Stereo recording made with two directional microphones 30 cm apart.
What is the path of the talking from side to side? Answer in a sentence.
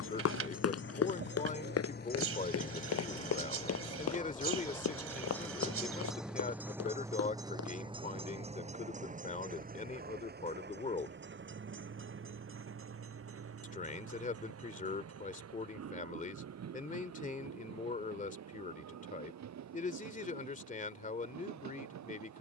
You can hear the talking stay put.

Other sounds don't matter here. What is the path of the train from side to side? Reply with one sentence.
You can hear the train go from the left side to the right.